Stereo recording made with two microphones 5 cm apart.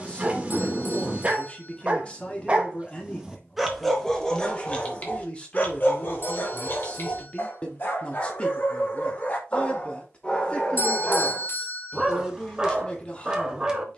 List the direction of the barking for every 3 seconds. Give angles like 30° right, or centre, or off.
20° right, 20° left, 50° left, 20° left, 10° right.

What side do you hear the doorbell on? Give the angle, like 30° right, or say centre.
60° left.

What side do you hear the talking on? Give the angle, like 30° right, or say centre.
30° left.